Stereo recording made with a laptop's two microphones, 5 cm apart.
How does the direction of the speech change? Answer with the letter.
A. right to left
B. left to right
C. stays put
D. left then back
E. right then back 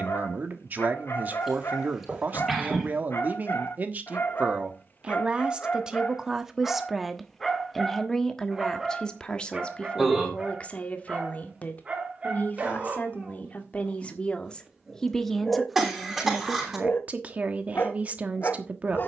D.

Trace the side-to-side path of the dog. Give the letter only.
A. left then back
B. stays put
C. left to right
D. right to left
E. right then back
E.